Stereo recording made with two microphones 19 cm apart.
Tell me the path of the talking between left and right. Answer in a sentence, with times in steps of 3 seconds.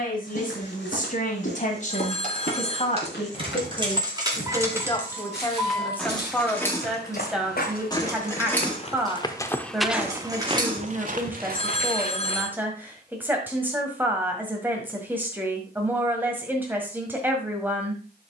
You can hear the talking on the left from 0 s and in the centre from 6 s.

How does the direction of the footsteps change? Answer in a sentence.
In this clip you hear the footsteps move to the right.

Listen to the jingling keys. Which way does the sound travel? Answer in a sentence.
In this clip you hear the jingling keys go left and come back.